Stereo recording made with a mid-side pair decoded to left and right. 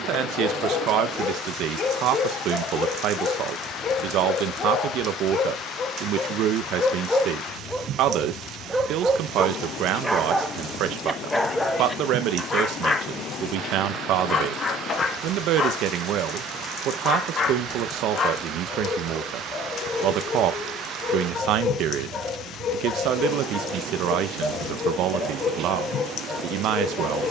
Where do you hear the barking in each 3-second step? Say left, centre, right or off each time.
left, left, centre, centre, left, left, left, left, left.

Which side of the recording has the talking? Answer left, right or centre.
right.